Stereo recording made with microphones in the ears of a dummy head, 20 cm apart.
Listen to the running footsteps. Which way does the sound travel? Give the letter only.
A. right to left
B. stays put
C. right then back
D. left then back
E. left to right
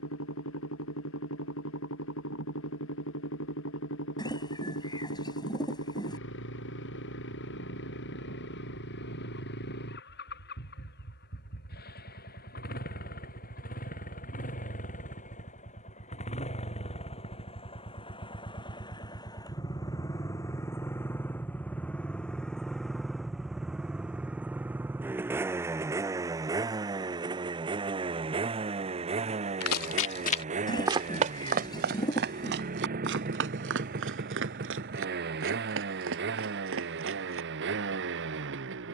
E.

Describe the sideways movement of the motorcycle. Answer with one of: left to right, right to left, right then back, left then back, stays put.
left to right.